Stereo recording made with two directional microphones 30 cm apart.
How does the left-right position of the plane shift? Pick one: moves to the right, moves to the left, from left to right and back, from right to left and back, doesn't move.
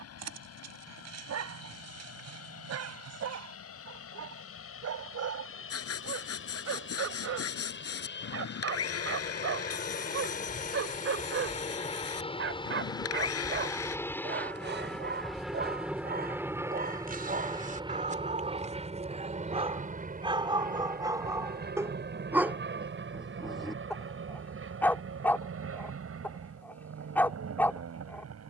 moves to the right.